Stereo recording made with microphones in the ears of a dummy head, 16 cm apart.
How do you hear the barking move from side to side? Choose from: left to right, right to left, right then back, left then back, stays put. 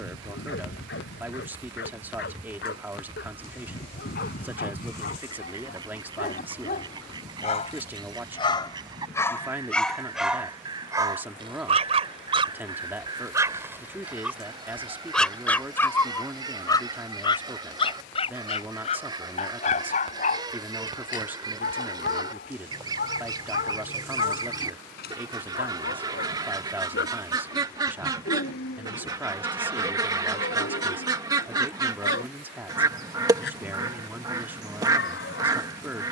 right then back.